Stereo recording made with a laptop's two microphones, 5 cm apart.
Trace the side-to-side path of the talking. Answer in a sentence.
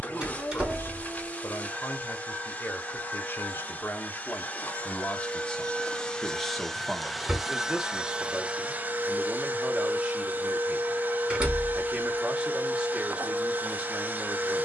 You can hear the talking go from the left side to the right.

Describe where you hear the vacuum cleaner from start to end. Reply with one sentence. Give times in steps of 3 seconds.
In this clip you hear the vacuum cleaner on the left from 0 s, in the centre from 6 s and on the right from 9 s.